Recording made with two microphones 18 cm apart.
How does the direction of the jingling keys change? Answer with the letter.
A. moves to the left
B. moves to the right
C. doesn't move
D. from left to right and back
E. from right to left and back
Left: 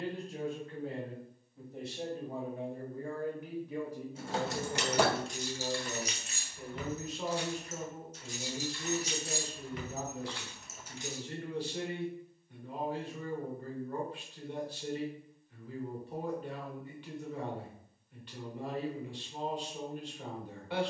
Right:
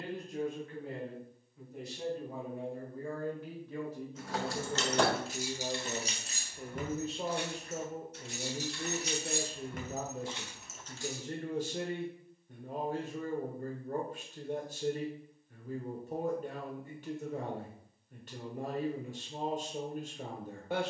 D.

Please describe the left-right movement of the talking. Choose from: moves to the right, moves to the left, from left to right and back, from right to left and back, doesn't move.
moves to the right.